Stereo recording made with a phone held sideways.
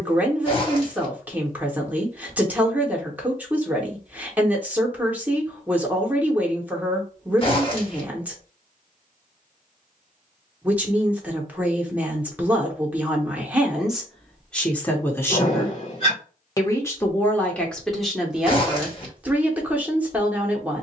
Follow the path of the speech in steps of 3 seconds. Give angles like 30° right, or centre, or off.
10° right, 10° right, 10° right, 10° right, centre, 10° left, 10° right.